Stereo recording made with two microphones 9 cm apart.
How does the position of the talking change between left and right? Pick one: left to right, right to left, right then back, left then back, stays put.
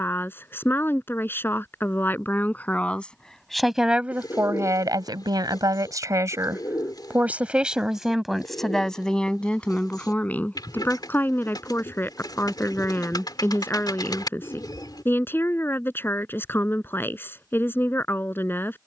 right then back.